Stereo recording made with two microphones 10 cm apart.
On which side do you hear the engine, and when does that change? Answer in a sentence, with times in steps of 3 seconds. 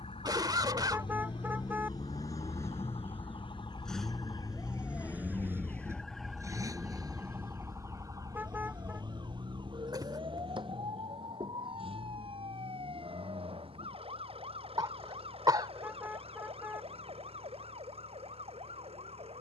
In this clip you hear the engine on the left from 0 s, in the centre from 3 s and on the right from 6 s.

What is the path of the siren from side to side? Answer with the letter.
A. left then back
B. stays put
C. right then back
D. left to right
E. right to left
D.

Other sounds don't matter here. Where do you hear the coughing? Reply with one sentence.
You can hear the coughing on the right.